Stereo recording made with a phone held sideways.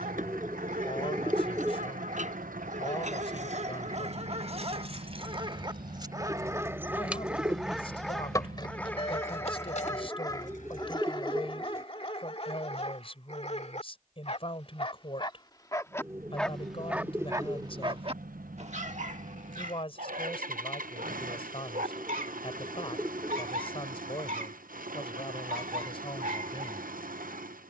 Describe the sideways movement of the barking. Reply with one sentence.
You can hear the barking go left and come back.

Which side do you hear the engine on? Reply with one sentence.
In this clip you hear the engine on the right.